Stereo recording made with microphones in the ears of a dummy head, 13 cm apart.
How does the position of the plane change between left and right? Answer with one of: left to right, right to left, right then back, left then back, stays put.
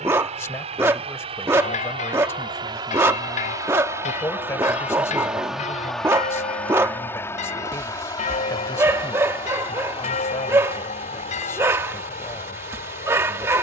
right to left.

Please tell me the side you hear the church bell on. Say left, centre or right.
left.